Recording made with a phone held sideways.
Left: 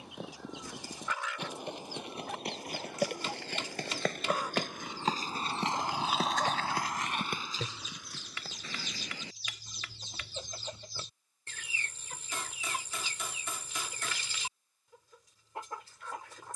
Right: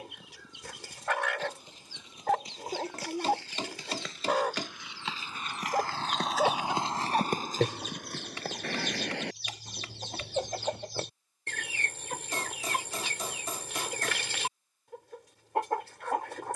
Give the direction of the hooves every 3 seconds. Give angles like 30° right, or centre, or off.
70° left, 50° left, 40° right, 80° right, off, off.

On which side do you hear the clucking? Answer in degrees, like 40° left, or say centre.
80° right.